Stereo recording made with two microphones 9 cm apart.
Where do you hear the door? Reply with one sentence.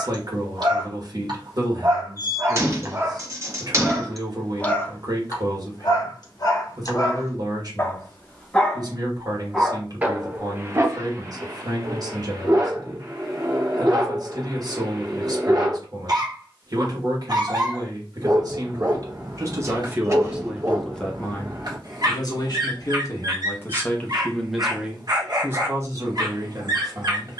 In this clip you hear the door on the right.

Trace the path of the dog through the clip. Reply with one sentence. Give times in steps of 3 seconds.
In this clip you hear the dog on the right from 0 s, in the centre from 3 s, on the left from 6 s and on the right from 9 s.